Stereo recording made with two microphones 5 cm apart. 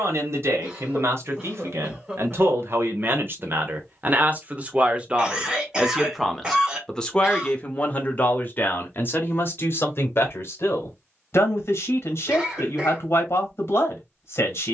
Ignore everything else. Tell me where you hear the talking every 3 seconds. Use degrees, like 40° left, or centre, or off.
60° right, 30° right, 20° left, 50° left, 60° left.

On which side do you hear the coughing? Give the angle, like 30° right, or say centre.
20° right.